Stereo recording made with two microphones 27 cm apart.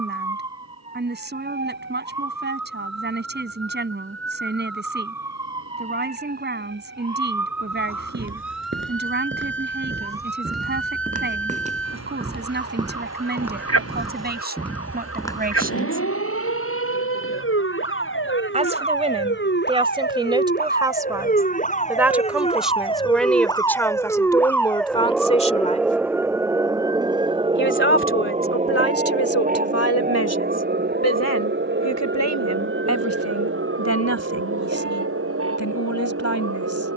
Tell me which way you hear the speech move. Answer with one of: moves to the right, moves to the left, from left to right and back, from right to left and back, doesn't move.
moves to the left.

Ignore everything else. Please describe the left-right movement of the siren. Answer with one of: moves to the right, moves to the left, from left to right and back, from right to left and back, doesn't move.
moves to the right.